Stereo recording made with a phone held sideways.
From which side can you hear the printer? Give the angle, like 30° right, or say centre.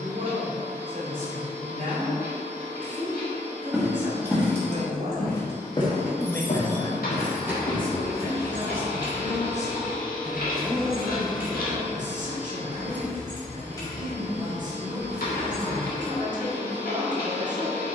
70° left.